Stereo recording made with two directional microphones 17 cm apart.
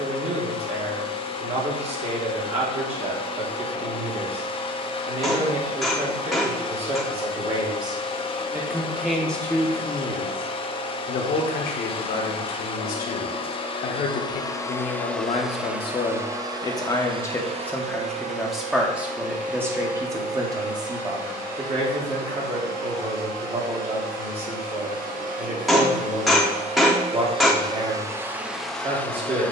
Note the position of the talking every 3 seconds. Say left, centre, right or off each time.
right, right, right, left, left, left, centre, right, right, right.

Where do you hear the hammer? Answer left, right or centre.
centre.